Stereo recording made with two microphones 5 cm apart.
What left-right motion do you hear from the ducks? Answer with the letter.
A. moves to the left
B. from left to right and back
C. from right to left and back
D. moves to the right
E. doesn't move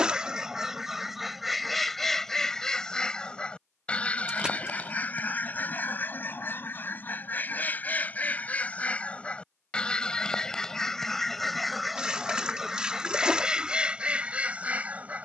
C.